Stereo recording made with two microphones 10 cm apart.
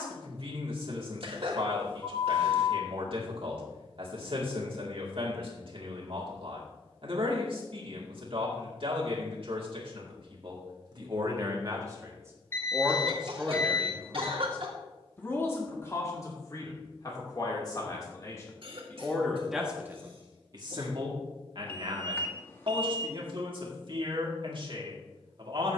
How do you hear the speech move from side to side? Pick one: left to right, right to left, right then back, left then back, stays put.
left then back.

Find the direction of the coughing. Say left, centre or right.
right.